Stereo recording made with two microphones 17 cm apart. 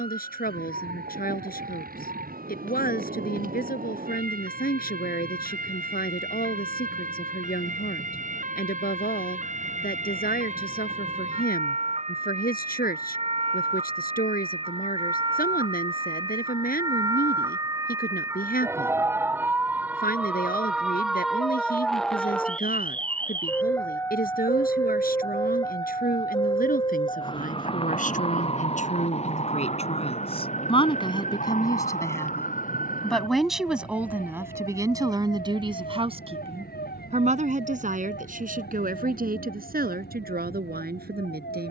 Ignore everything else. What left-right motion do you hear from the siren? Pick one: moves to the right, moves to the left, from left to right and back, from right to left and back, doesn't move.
moves to the left.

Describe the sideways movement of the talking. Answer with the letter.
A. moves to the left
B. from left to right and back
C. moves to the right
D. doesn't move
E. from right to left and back
C.